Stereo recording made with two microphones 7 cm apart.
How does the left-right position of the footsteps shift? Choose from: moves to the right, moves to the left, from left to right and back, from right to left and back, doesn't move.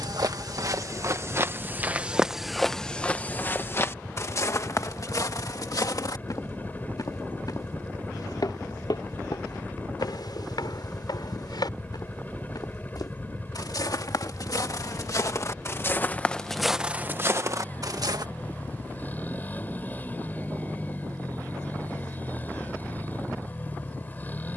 from right to left and back.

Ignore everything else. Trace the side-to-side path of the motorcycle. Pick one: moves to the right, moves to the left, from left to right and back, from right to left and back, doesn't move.
doesn't move.